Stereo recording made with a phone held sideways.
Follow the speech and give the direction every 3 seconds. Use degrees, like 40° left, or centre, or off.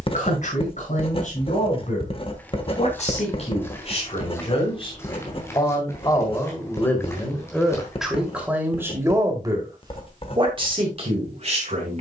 60° left, 40° left, centre, 40° right.